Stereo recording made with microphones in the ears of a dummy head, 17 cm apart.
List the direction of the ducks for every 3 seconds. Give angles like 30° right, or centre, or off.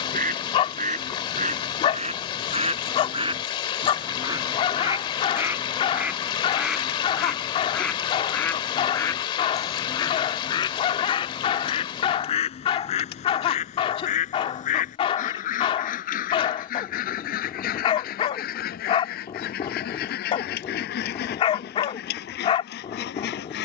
40° right, 20° right, centre, 20° left, 40° left, 50° left, 60° left, 60° left.